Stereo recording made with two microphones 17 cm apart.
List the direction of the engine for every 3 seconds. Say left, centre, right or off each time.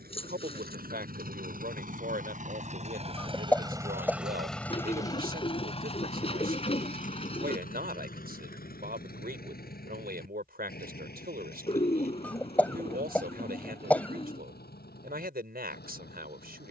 right, centre, left, left, left, left.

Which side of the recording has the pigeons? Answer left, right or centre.
left.